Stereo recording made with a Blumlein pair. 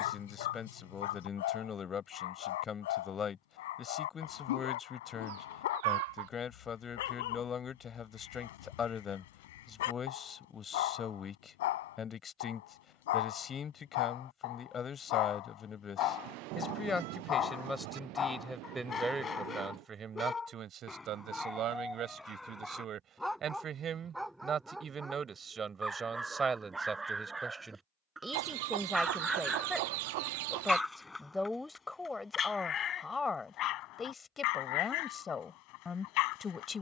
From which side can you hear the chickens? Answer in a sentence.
In this clip you hear the chickens on the right.